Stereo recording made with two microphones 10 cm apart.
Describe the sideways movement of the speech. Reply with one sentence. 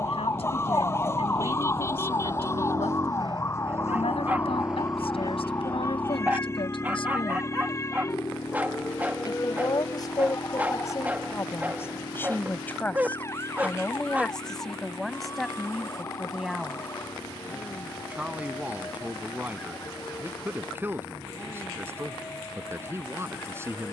You can hear the speech go from the left side to the right.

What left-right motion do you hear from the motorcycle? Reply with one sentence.
You can hear the motorcycle move from right to left.